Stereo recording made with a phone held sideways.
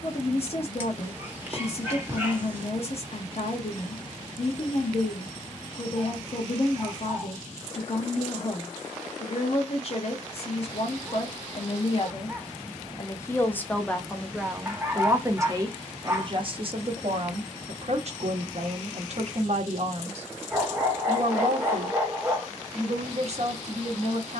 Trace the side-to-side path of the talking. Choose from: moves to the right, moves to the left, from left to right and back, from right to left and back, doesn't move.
moves to the right.